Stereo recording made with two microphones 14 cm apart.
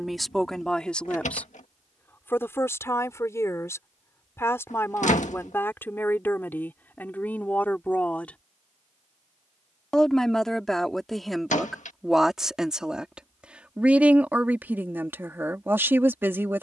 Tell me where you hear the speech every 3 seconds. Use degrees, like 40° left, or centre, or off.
10° left, 20° left, 10° left, centre, 10° right, 20° right.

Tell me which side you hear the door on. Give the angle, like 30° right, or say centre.
70° left.